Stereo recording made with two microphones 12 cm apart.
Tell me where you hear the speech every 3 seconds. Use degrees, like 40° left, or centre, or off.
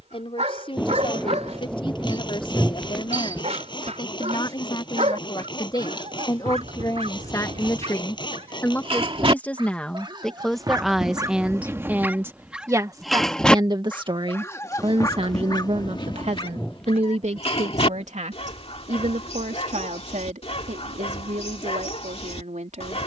50° left, 40° left, 30° left, centre, 30° right, 60° right, 80° right, 80° right.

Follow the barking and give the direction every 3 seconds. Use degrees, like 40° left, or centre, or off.
60° right, 60° right, 60° right, 30° right, 10° left, 40° left, 50° left, 50° left.